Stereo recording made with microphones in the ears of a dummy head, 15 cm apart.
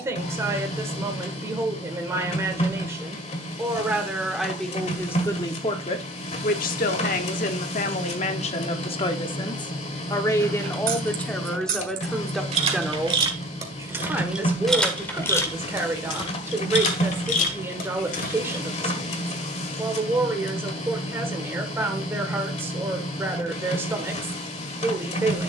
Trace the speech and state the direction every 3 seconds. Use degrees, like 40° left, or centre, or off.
20° right, 10° left, 40° left, 20° left, 10° right, 10° right, 10° right, 10° right, 10° right.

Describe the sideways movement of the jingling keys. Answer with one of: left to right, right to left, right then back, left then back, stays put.
right to left.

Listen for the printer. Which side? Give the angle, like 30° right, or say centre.
40° left.